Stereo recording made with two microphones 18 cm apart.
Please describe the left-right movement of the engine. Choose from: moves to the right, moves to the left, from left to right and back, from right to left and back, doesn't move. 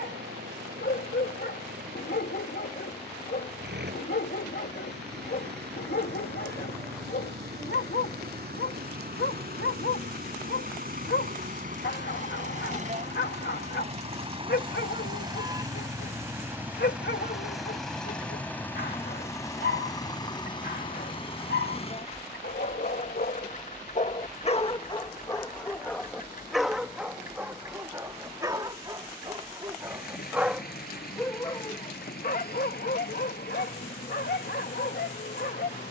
moves to the left.